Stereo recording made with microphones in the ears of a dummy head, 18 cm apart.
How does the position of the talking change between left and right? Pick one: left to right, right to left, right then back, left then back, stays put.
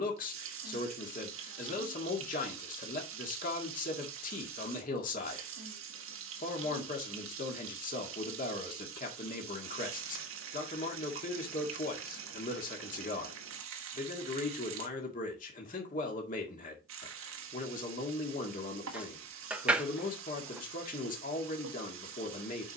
stays put.